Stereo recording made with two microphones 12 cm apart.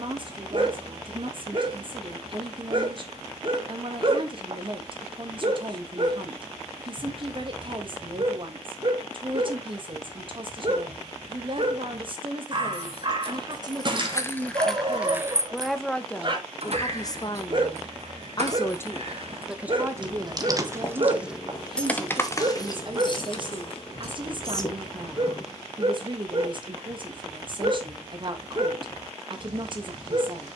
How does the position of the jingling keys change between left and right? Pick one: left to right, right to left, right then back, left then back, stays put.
right then back.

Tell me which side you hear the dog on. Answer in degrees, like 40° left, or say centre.
40° right.